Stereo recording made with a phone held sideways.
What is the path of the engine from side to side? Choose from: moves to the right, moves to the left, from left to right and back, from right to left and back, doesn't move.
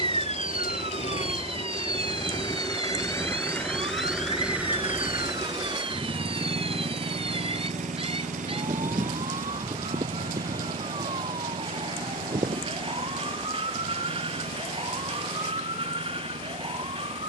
moves to the right.